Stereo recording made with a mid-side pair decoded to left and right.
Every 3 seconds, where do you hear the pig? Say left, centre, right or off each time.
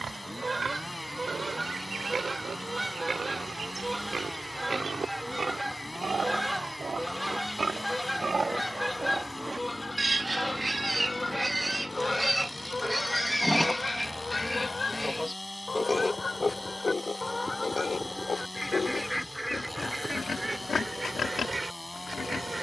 right, right, right, right, centre, left, left, left.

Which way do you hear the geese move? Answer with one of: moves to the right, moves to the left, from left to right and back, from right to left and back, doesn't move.
from right to left and back.